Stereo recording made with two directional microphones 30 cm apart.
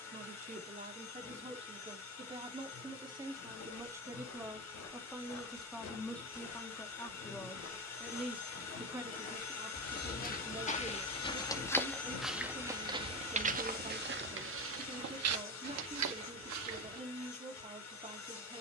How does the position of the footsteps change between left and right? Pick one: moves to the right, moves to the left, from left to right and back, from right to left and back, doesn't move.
moves to the right.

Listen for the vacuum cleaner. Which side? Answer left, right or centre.
left.